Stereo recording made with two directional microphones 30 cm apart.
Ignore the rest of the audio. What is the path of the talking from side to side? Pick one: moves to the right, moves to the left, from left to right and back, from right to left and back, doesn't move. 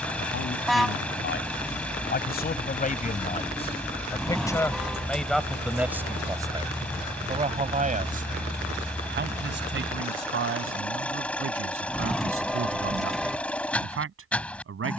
moves to the right.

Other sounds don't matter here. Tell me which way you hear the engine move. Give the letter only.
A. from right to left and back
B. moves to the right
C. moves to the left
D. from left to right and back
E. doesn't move
E.